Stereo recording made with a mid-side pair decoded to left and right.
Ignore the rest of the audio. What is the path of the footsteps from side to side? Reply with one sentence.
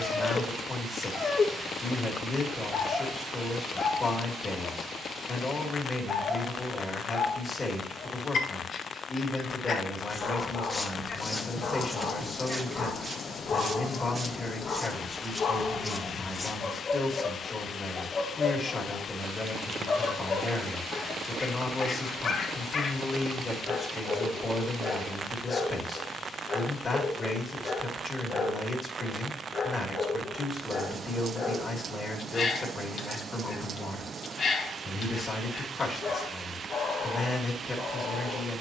In this clip you hear the footsteps move from left to right and back again.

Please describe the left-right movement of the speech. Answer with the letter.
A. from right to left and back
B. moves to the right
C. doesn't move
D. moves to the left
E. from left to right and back
C.